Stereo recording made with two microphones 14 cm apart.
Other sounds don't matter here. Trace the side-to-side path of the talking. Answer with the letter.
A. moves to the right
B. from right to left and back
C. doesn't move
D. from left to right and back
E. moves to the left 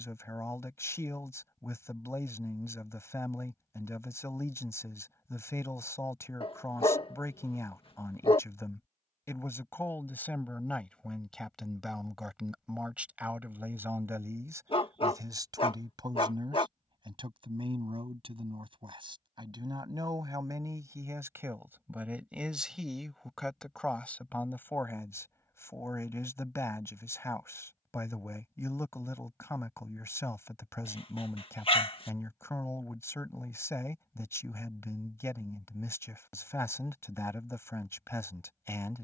D.